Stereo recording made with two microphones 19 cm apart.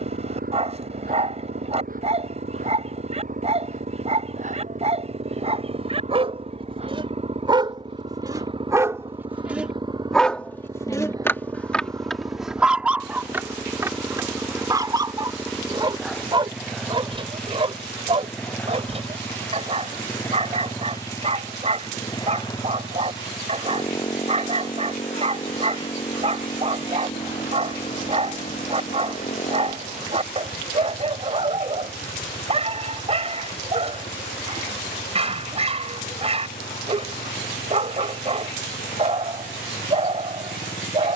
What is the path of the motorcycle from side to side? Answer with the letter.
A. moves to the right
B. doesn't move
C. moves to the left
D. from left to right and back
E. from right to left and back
C.